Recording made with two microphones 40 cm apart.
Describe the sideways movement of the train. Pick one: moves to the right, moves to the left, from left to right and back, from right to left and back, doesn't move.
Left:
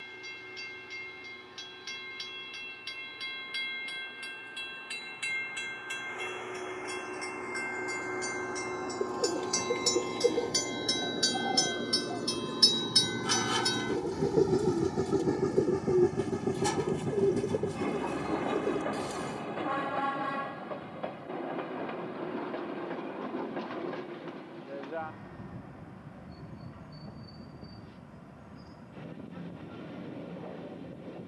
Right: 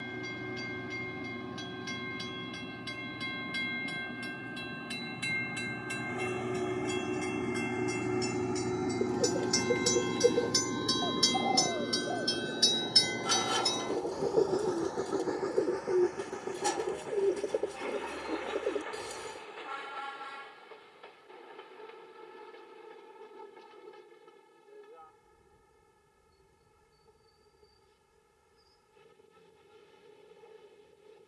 moves to the left.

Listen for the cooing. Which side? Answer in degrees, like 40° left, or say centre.
20° left.